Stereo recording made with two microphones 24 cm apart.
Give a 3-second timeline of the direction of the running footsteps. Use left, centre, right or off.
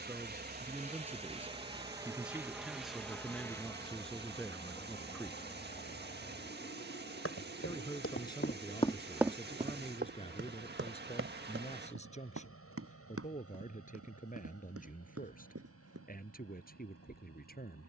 off, off, left, right, right, right.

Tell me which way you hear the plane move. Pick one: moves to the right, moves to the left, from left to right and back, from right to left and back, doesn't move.
moves to the left.